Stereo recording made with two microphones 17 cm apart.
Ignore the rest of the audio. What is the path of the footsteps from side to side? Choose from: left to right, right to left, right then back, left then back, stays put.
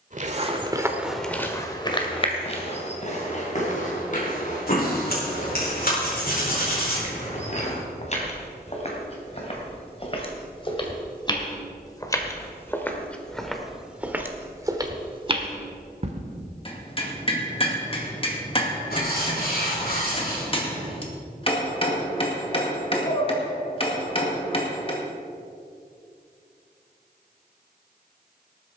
left then back.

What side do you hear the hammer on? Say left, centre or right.
left.